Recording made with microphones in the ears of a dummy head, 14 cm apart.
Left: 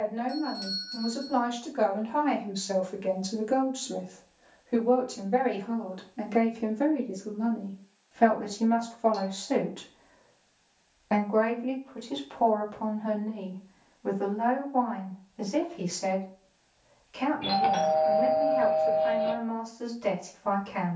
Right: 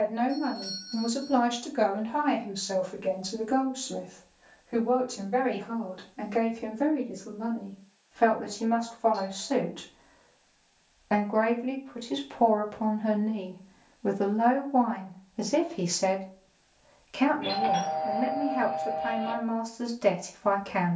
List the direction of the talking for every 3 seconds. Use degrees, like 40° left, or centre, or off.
20° right, 30° left, 30° left, 10° left, 30° right, 60° right, 60° right.